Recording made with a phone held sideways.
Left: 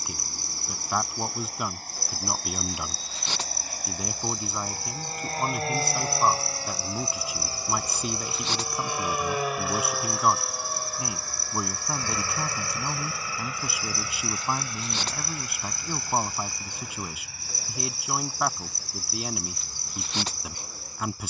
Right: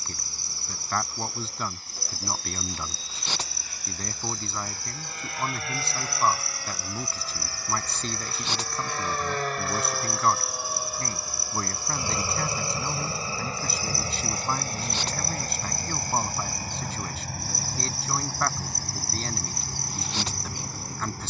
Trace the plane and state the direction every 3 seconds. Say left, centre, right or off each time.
left, left, left, centre, right, right, right.